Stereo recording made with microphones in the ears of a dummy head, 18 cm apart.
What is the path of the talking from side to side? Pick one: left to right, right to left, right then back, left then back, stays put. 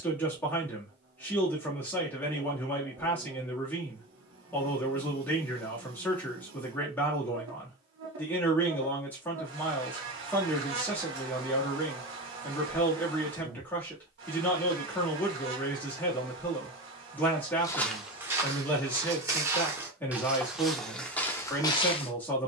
stays put.